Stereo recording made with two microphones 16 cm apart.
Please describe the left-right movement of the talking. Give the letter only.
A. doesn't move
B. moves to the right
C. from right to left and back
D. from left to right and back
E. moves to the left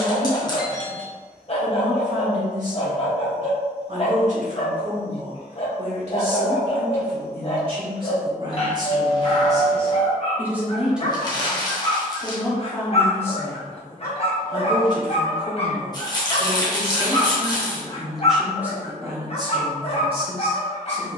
C.